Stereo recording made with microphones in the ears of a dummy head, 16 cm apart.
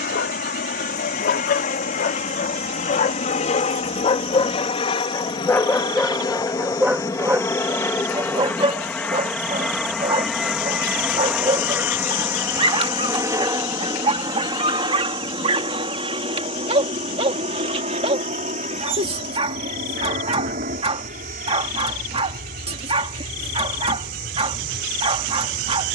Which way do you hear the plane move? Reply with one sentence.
You can hear the plane travel towards the right.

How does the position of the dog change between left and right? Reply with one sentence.
You can hear the dog travel towards the right.